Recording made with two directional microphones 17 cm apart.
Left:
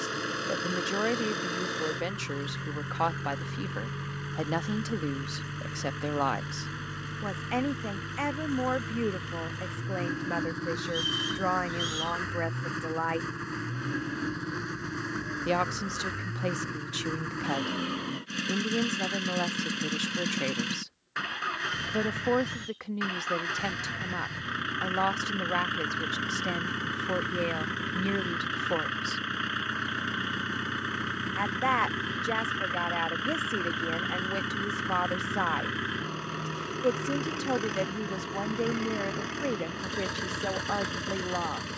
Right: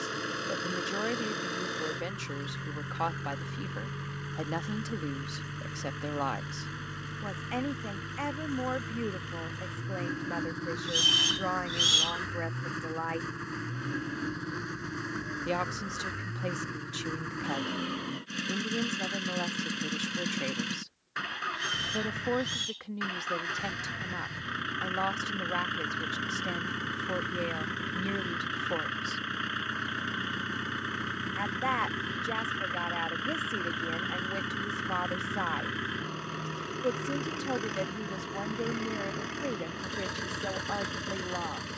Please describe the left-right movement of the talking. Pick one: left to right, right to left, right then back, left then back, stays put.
stays put.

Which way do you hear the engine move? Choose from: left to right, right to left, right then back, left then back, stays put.
stays put.